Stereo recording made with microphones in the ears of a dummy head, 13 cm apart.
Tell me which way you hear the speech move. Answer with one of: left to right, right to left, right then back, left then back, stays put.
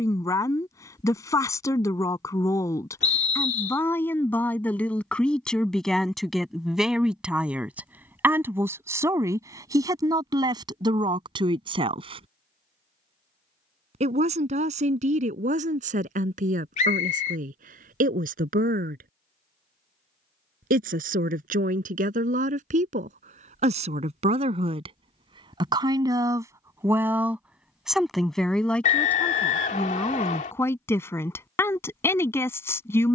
right then back.